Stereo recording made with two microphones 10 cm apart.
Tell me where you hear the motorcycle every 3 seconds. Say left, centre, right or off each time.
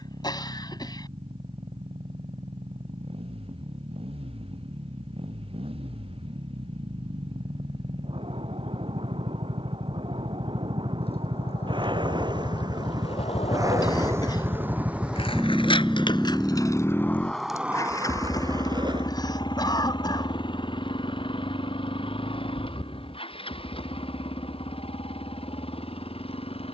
right, right, right, right, right, centre, left, left, left.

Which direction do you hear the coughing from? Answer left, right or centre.
left.